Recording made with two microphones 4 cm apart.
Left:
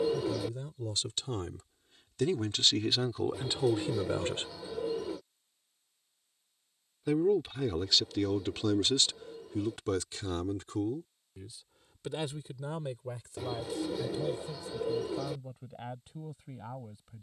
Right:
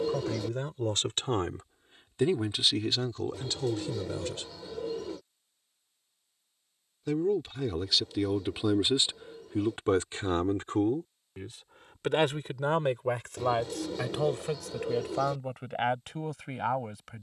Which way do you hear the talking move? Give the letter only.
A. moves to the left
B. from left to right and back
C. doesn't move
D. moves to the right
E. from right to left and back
E.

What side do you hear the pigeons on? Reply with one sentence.
You can hear the pigeons in the centre.